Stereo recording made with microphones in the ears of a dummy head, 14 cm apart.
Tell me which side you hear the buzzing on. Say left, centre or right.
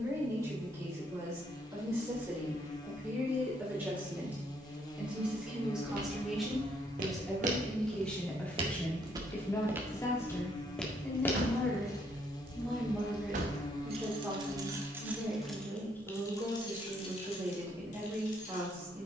left.